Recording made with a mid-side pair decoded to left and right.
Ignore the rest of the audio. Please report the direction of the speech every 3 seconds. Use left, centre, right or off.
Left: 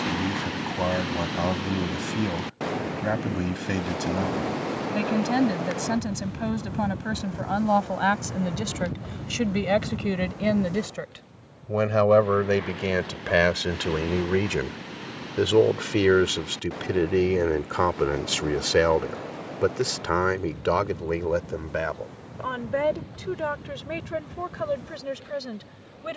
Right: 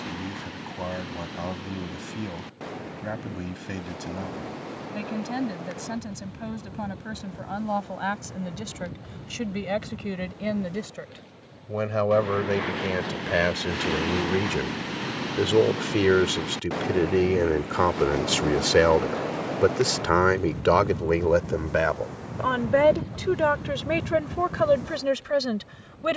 left, left, left, left, left, centre, right, right, right.